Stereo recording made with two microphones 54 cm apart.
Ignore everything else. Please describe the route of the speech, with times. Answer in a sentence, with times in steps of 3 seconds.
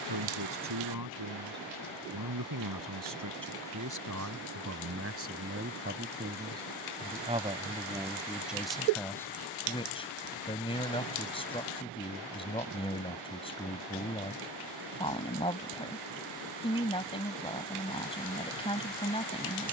You can hear the speech on the right from 0 s and in the centre from 6 s.